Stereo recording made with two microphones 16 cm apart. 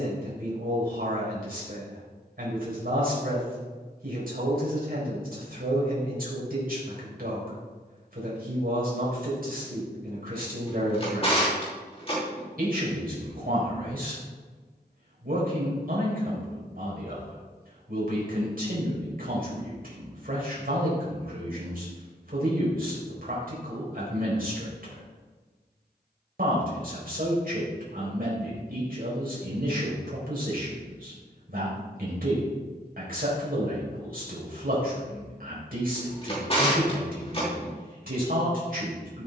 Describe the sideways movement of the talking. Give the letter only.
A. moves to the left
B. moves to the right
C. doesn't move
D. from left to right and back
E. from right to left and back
C.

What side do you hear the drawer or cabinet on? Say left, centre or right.
left.